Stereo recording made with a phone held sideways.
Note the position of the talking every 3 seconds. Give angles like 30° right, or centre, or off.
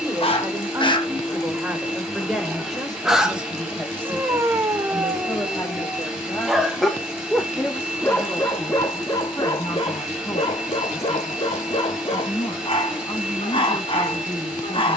10° right, 10° left, 20° left, 30° left, 30° left.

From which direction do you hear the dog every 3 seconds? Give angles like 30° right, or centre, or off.
20° left, 10° right, 10° left, 40° left, 40° left.